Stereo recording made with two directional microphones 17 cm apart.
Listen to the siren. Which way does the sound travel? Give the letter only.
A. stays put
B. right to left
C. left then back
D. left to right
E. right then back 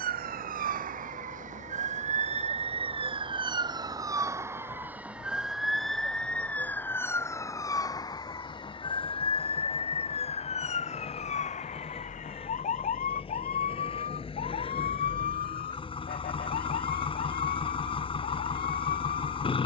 B.